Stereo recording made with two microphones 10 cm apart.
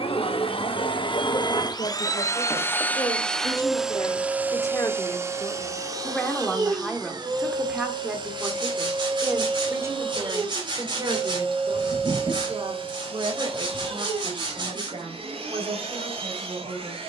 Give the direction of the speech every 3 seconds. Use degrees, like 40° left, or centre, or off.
50° left, 30° left, centre, 30° right, 50° right, 60° right.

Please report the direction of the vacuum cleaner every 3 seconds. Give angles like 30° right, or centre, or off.
40° left, 10° right, 40° right, 60° right, 60° right, 60° right.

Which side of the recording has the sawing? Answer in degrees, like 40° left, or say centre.
50° right.